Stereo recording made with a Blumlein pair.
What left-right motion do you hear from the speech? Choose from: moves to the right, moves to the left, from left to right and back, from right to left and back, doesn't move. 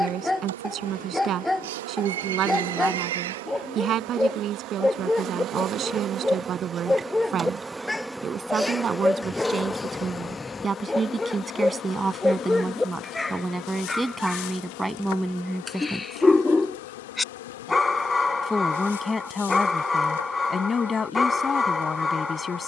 moves to the left.